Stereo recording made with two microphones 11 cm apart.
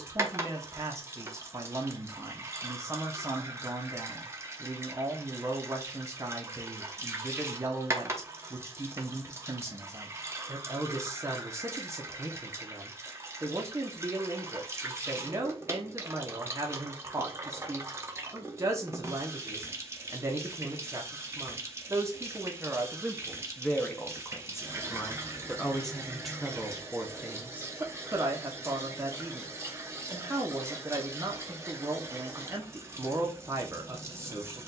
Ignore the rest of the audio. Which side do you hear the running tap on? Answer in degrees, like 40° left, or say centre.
20° right.